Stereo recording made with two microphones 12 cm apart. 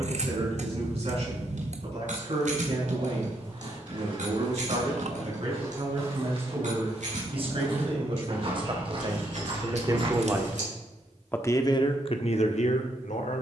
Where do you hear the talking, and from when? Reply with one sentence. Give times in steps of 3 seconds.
You can hear the talking on the right from 0 s, in the centre from 9 s and on the left from 12 s.